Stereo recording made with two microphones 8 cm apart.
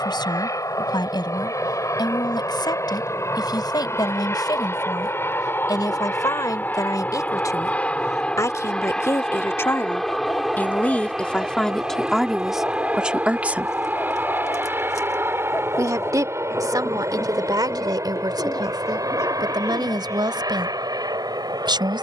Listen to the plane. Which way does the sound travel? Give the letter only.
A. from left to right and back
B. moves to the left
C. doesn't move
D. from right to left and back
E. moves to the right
E.